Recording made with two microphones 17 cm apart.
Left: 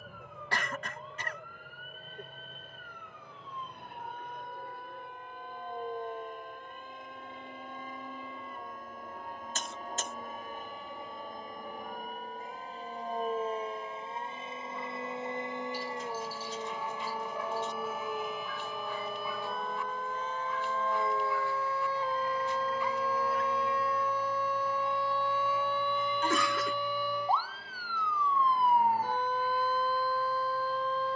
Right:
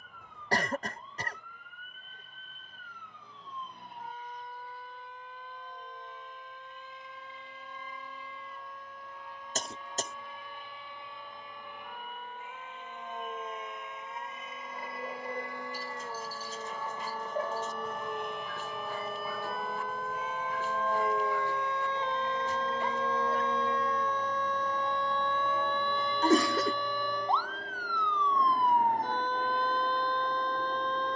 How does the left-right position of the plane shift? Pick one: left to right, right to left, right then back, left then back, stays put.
left to right.